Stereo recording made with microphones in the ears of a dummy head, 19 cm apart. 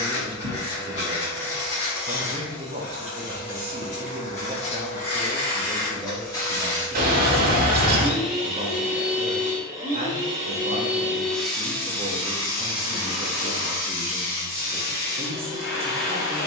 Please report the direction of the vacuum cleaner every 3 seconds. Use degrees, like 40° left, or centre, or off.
50° left, 30° left, 10° left, 10° right, 30° left, 50° left.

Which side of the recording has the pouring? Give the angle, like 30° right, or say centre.
50° right.